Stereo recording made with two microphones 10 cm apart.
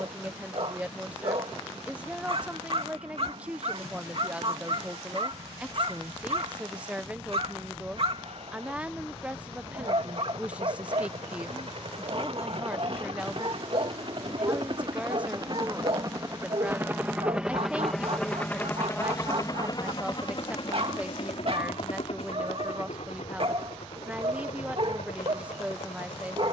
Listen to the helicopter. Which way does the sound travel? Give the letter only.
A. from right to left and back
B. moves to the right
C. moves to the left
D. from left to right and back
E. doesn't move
C.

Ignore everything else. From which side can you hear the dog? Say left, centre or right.
right.